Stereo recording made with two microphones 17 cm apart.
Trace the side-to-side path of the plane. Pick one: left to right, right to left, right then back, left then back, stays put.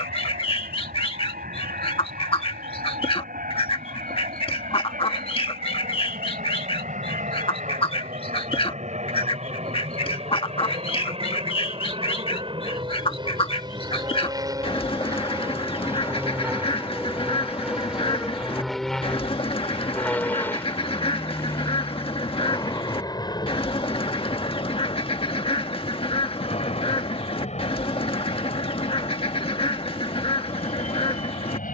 right to left.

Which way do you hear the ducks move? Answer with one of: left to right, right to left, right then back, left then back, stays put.
stays put.